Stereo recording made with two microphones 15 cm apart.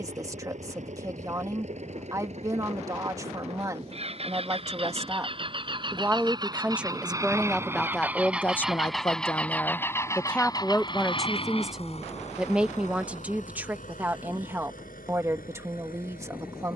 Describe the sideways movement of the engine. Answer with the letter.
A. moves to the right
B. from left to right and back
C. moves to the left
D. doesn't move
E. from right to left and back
C.